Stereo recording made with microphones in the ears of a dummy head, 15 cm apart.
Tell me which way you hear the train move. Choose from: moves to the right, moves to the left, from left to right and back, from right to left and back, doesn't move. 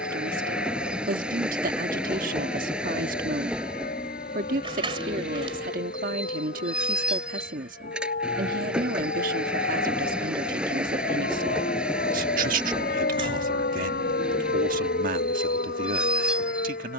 doesn't move.